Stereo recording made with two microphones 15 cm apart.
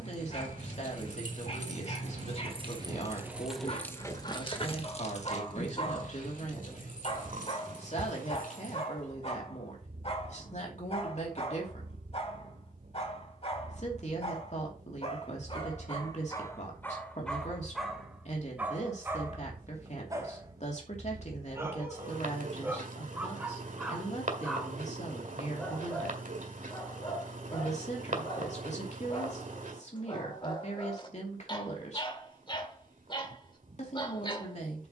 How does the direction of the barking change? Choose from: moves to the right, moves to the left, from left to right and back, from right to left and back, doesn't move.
from left to right and back.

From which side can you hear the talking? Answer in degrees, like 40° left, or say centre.
50° left.